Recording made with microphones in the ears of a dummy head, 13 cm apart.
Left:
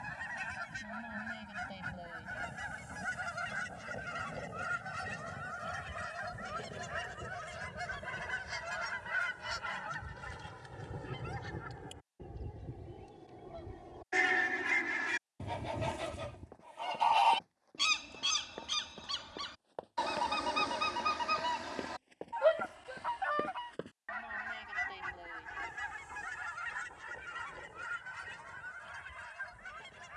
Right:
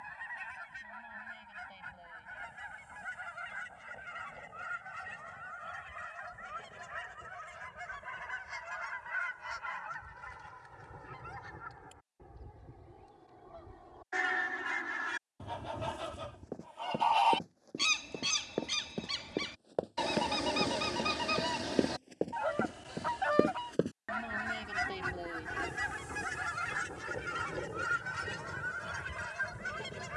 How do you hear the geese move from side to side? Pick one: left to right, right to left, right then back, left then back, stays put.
left to right.